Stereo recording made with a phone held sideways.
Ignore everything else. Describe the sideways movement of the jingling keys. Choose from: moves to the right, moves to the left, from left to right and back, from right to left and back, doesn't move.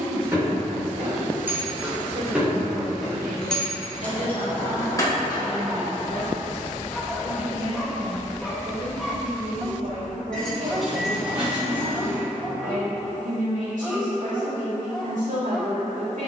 from right to left and back.